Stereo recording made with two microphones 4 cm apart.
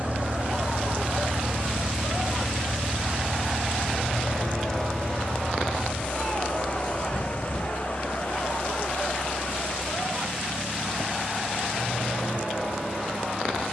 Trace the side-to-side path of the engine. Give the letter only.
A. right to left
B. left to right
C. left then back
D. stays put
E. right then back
A.